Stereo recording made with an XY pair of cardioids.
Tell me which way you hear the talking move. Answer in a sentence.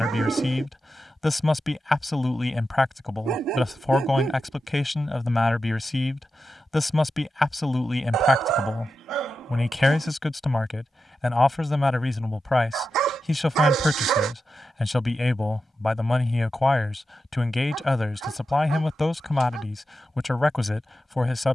You can hear the talking stay in one place.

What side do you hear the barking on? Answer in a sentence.
You can hear the barking on the right.